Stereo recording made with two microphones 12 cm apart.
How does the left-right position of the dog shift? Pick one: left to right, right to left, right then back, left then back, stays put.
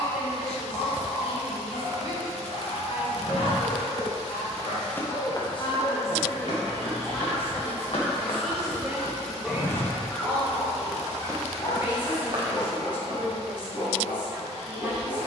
right then back.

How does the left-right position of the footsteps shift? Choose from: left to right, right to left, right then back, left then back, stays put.
left then back.